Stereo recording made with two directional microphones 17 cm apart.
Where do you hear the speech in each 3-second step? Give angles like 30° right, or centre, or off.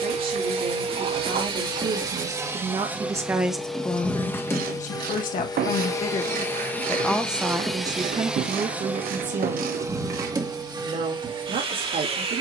50° right, 20° left, 10° right, 50° right.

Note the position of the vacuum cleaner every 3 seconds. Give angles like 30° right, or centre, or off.
30° right, 10° left, centre, 20° right.